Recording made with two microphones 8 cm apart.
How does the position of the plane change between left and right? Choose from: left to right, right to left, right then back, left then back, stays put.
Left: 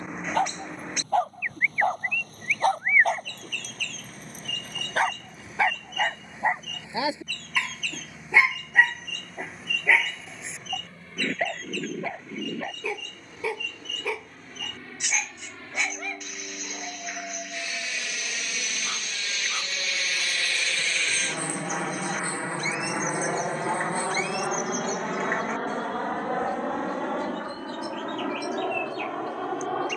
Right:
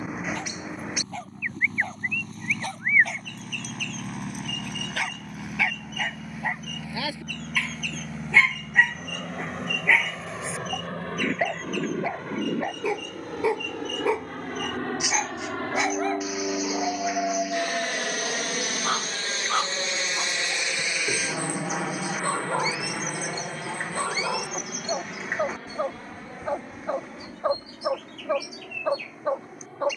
right to left.